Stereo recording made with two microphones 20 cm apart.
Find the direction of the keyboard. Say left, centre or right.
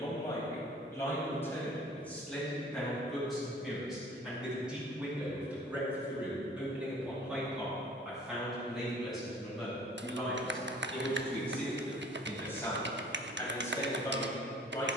right.